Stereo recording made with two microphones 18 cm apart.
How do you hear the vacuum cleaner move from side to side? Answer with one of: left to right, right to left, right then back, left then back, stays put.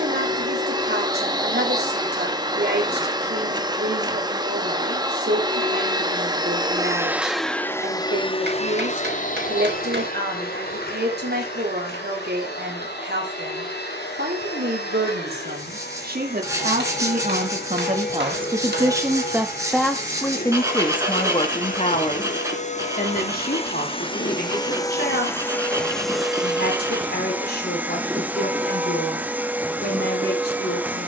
left then back.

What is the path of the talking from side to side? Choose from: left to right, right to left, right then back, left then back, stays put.
right to left.